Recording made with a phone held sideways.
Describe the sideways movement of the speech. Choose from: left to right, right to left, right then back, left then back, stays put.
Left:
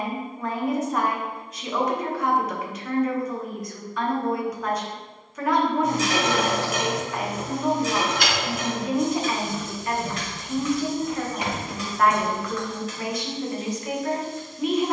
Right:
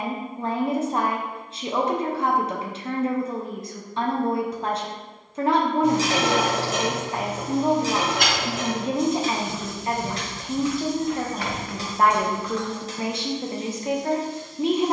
stays put.